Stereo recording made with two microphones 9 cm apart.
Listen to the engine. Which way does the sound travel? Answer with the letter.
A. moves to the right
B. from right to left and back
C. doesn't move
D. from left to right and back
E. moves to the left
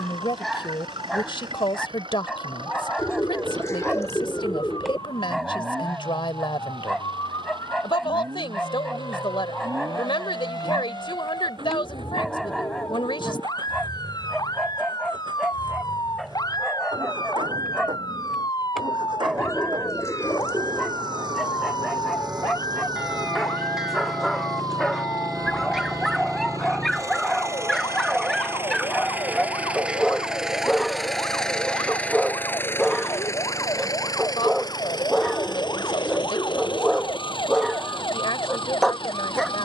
E.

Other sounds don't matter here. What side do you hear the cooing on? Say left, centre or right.
left.